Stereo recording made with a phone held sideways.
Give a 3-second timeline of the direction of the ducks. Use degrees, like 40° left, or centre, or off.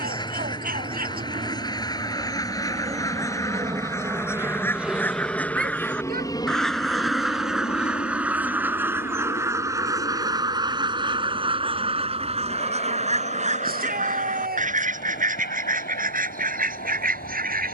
30° left, 10° left, 10° right, 30° right, 50° right, 70° right.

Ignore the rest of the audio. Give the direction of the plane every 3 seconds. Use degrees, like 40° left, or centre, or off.
50° right, 10° right, 40° left, 60° left, 70° left, 70° left.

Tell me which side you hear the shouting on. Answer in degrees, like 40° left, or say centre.
80° right.